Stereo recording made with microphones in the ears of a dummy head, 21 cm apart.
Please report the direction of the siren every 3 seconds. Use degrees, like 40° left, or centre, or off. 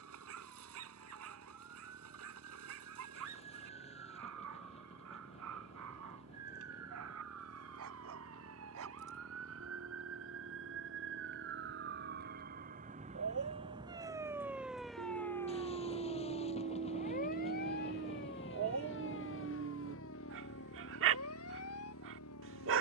80° right, 80° right, 70° right, 60° right, 20° right, 30° left, 50° left, 60° left.